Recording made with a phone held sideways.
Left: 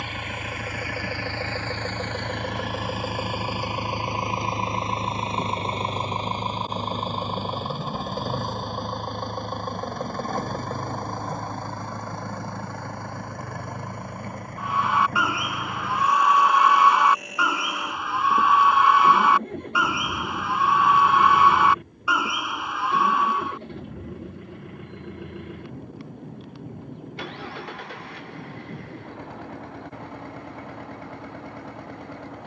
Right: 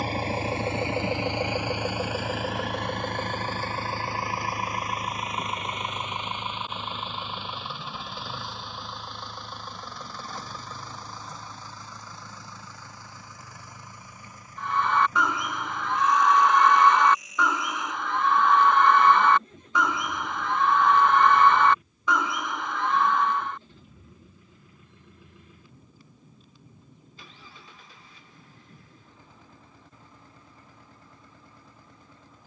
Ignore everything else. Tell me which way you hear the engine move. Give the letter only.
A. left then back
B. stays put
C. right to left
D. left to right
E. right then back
C.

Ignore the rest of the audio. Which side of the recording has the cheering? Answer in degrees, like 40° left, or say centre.
10° left.